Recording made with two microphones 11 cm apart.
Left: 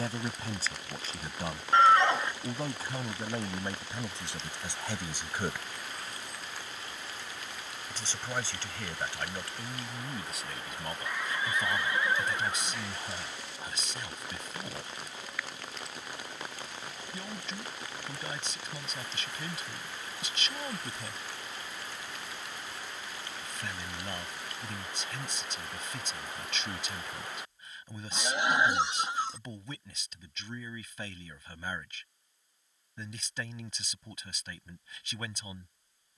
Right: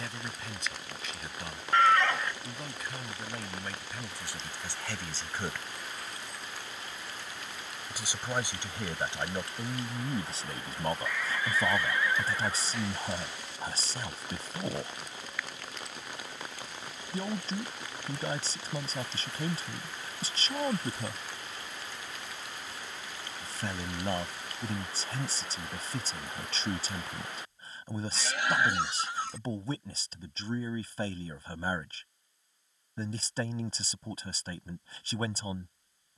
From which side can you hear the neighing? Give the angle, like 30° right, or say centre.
20° left.